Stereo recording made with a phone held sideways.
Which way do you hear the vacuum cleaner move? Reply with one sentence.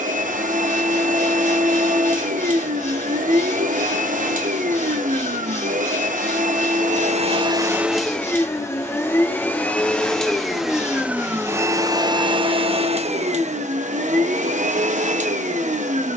In this clip you hear the vacuum cleaner go left and come back.